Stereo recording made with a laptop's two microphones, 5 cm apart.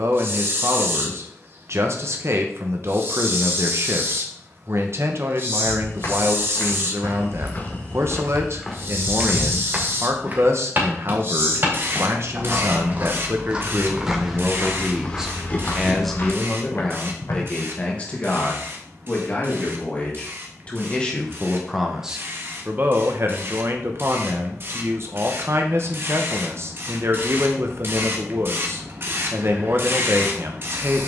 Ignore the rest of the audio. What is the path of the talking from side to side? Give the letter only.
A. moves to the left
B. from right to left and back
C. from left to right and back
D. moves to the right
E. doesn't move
B.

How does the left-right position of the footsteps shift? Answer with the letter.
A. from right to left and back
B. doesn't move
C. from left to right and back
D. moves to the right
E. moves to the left
C.